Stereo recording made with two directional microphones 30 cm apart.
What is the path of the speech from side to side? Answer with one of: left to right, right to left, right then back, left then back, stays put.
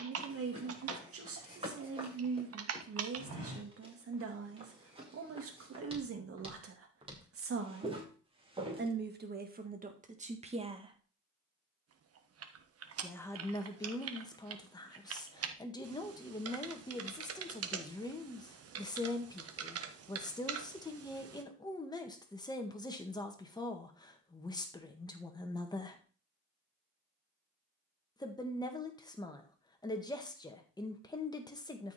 right to left.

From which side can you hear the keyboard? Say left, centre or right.
right.